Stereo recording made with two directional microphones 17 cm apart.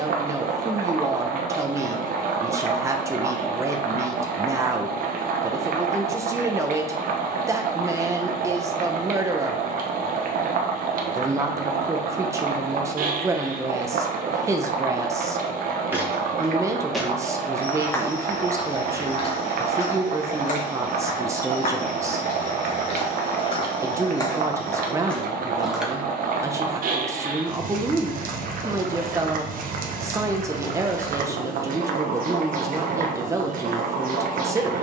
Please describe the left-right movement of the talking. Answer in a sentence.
In this clip you hear the talking stay in one place.